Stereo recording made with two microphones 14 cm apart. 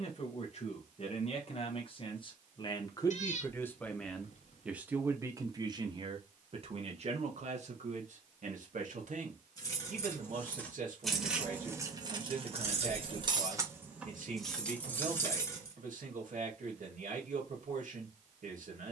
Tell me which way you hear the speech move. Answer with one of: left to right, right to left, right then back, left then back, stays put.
left to right.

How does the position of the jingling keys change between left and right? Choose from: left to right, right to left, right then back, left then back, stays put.
right then back.